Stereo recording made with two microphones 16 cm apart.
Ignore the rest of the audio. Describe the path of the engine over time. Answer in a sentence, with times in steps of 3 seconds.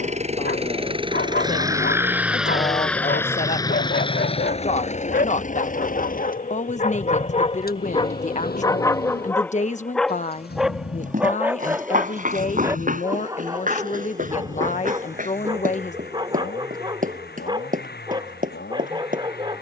You can hear the engine on the right from 0 s and on the left from 3 s.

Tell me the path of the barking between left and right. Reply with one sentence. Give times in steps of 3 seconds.
In this clip you hear the barking on the left from 0 s, in the centre from 9 s and on the right from 12 s.